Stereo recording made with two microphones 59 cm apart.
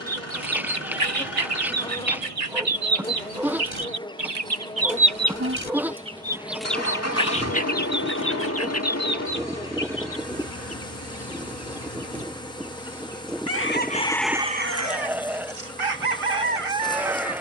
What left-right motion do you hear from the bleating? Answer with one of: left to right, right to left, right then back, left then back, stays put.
stays put.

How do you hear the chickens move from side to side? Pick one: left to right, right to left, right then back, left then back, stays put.
left then back.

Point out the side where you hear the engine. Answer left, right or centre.
left.